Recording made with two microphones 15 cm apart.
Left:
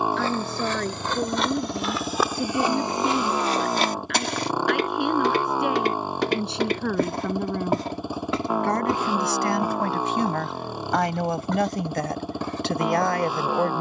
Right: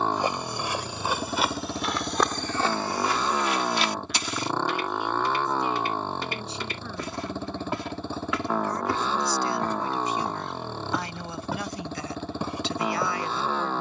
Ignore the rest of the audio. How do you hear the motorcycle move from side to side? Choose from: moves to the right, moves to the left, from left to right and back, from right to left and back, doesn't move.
doesn't move.